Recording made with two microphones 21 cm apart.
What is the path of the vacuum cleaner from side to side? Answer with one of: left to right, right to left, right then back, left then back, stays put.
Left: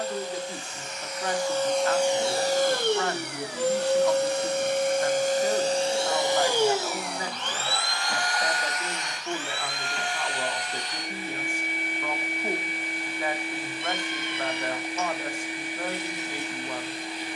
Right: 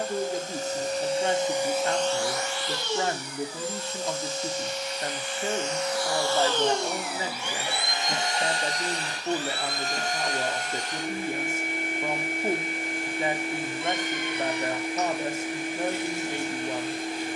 left then back.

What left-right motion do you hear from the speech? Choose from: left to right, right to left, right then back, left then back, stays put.
stays put.